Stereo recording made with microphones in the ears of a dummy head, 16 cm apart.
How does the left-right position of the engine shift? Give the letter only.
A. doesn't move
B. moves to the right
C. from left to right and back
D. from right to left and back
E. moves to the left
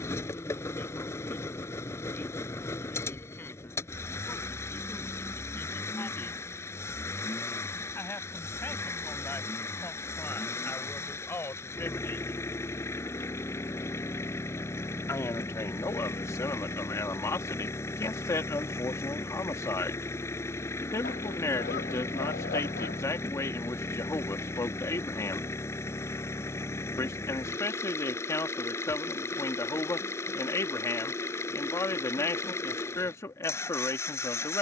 A.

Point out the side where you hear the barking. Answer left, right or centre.
left.